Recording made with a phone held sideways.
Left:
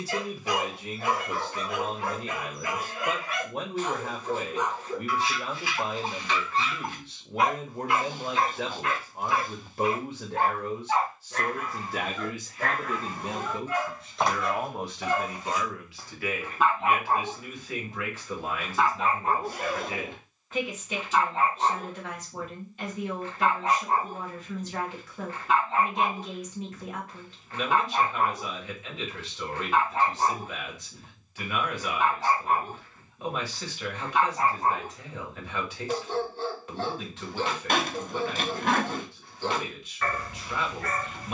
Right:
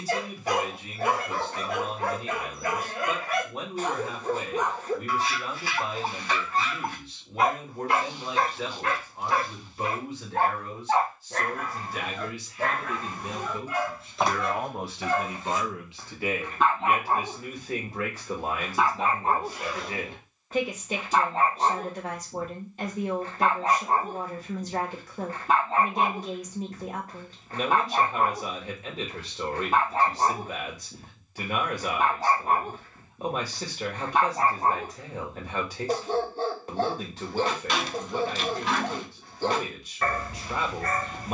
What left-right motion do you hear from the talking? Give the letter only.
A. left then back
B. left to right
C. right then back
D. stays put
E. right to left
B.